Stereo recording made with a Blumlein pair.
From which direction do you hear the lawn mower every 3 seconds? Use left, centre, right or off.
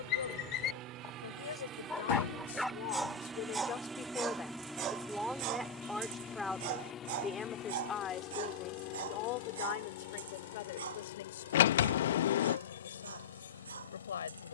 right, centre, left, left, left.